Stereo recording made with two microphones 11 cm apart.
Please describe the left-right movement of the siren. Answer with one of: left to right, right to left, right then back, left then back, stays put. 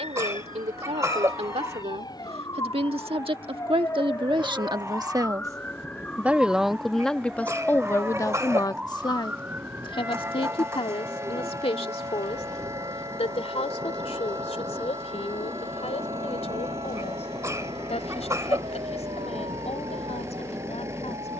left to right.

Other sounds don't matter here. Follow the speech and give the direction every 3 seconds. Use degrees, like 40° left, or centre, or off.
70° right, 50° right, 10° left, 50° left, 70° left, 70° left, 70° left.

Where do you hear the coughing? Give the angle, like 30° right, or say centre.
30° right.